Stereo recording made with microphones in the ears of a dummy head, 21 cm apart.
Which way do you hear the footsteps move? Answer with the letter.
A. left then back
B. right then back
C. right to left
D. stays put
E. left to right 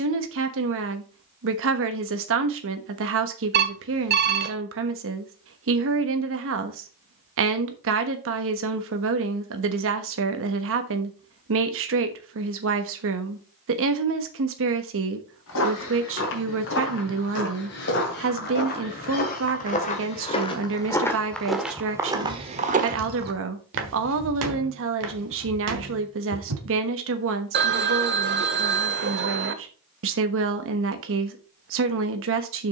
E.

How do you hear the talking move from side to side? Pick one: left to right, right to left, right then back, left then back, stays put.
stays put.